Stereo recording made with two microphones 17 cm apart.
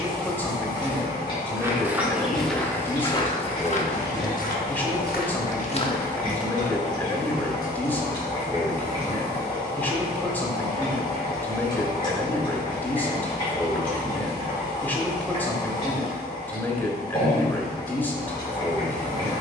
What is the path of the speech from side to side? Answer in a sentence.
In this clip you hear the speech stay put.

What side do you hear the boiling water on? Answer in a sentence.
In this clip you hear the boiling water on the left.